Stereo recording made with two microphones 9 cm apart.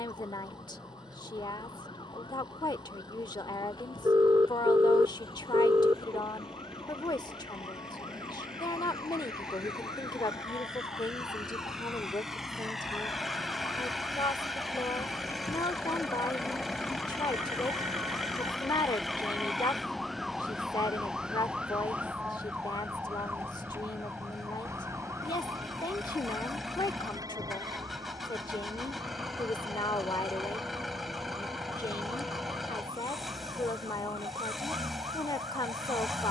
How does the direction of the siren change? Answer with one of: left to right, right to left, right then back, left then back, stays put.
left to right.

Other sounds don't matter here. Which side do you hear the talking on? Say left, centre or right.
left.